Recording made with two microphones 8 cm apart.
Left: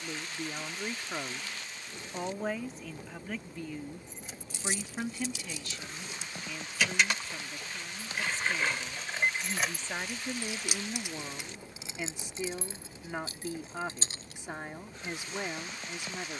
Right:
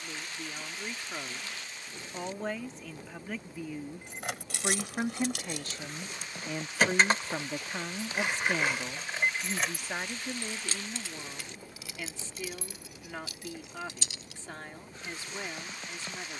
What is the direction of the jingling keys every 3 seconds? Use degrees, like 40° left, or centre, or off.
off, 60° right, 30° right, 10° left, 30° left, off.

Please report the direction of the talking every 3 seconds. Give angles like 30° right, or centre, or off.
10° left, 20° right, 50° right, centre, 20° left, 20° left.